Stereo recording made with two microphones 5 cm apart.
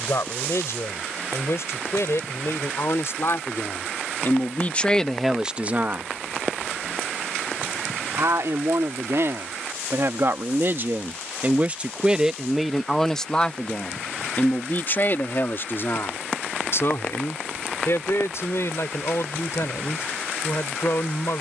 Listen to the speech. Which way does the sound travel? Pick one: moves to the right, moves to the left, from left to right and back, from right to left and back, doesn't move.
from left to right and back.